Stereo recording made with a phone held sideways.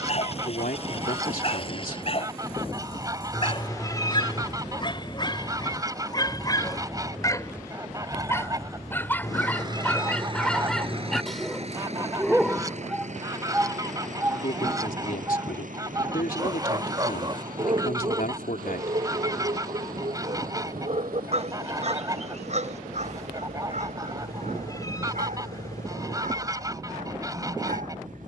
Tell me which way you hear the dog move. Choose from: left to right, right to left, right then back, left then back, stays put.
left to right.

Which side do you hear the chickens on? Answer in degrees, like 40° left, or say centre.
20° right.